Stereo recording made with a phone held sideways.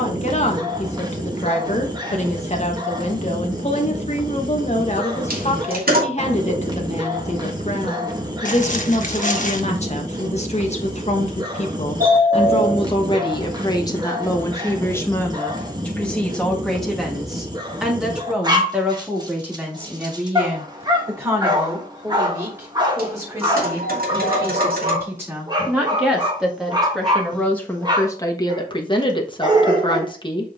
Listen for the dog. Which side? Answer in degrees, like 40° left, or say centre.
30° right.